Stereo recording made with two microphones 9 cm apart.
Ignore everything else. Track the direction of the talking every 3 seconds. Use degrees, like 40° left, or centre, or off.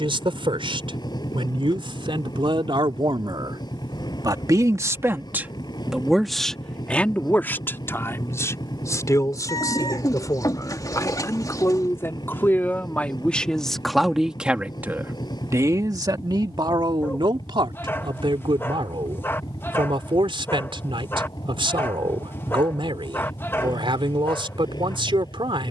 80° right, 40° right, 20° left, 40° left, 10° left, 50° right, 80° right, 80° right, 80° right.